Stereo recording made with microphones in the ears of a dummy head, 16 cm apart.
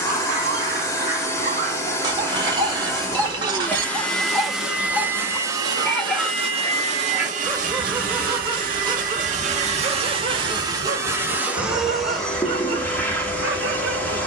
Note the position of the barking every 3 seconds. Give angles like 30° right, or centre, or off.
40° right, centre, 10° right, 40° right, 60° right.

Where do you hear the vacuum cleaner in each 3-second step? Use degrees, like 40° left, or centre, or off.
20° left, centre, 40° right, 20° right, 10° left.